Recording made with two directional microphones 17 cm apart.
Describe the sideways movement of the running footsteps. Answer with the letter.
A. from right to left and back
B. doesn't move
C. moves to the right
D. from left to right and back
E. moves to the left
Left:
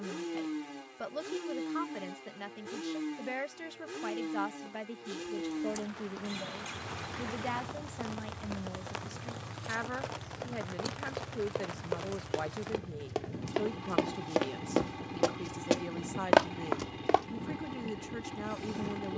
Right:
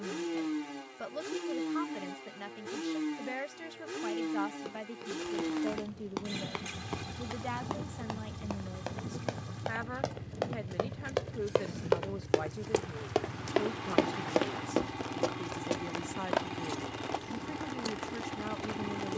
E.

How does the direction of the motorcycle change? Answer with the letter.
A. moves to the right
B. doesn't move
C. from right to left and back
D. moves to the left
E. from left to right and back
B.